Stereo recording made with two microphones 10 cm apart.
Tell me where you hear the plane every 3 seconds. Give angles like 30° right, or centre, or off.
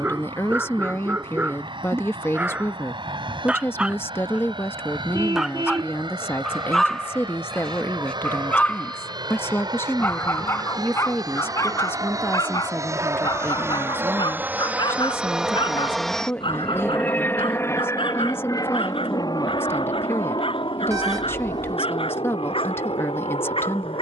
70° right, 60° right, 60° right, 50° right, 30° right, 10° left, 50° left, 60° left.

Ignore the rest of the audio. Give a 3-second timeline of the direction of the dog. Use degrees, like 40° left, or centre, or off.
20° right, 10° right, 10° left, 30° left, 50° left, 60° left, 70° left, 70° left.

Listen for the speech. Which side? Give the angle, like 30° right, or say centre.
20° left.